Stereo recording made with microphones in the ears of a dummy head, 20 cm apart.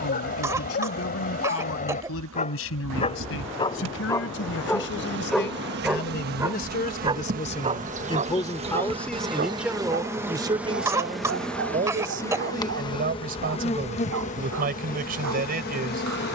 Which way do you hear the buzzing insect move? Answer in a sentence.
In this clip you hear the buzzing insect move from right to left.